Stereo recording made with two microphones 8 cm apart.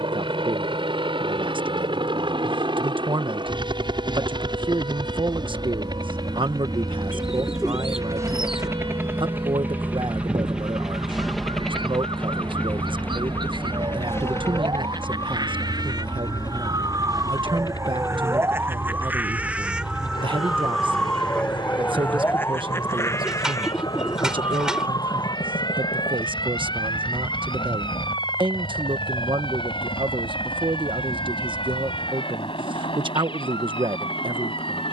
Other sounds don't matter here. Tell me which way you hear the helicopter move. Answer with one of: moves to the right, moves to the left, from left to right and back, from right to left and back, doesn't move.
moves to the left.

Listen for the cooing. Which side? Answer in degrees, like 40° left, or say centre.
10° right.